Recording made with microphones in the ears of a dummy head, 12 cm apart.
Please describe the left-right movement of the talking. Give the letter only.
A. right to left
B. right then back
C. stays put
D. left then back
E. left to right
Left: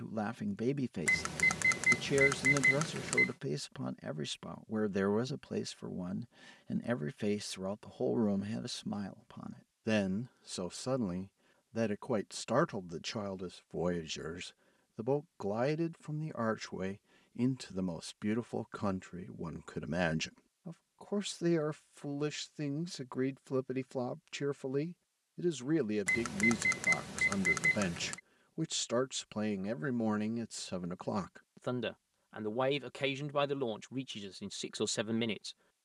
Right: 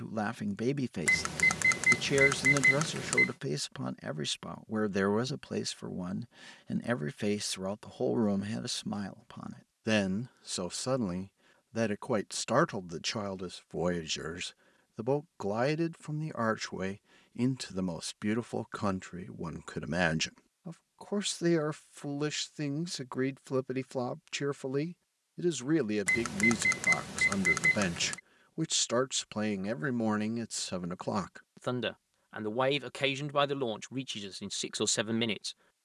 C.